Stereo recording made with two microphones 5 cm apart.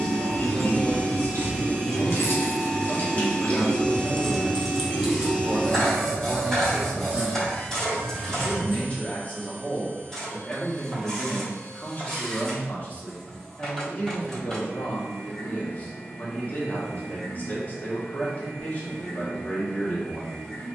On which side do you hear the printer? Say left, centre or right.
centre.